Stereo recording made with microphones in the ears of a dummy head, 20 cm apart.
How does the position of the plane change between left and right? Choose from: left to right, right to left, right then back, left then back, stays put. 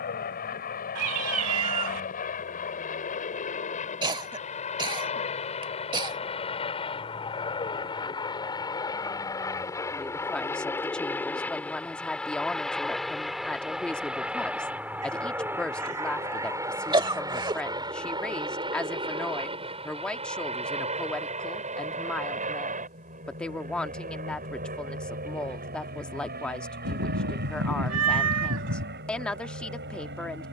left to right.